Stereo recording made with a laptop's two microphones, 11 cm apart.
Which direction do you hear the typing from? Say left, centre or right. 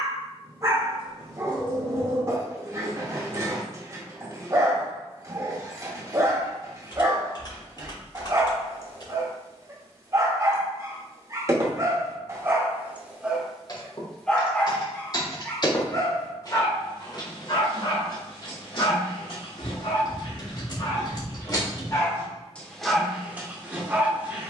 left.